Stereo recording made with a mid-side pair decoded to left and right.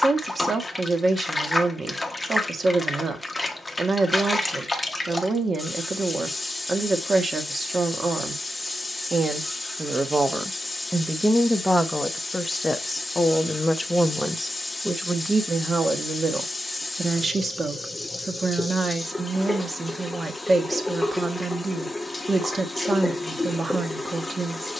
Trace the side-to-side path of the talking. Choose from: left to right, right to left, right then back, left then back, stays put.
left then back.